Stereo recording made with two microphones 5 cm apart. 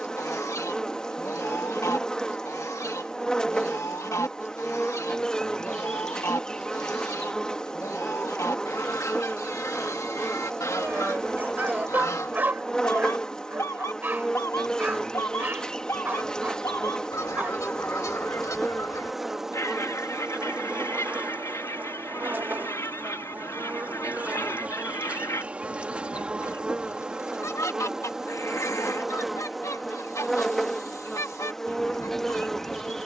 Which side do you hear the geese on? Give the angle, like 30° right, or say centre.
70° left.